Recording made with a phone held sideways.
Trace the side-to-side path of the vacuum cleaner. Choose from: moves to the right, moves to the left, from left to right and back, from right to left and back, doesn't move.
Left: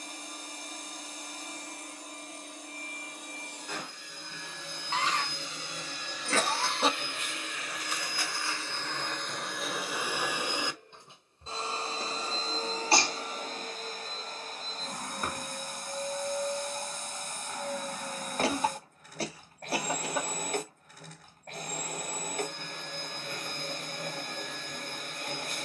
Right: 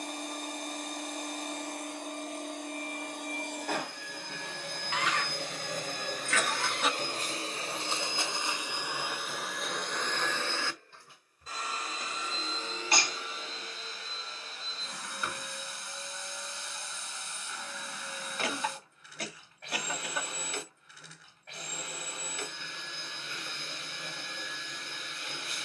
moves to the left.